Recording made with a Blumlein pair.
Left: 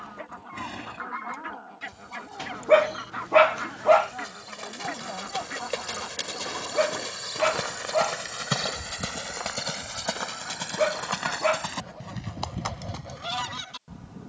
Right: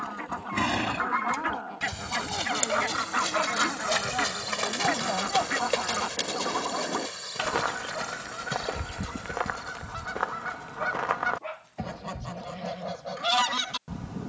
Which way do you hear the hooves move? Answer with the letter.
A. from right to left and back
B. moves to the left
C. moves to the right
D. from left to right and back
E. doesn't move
B.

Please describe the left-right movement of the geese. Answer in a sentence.
You can hear the geese stay in one place.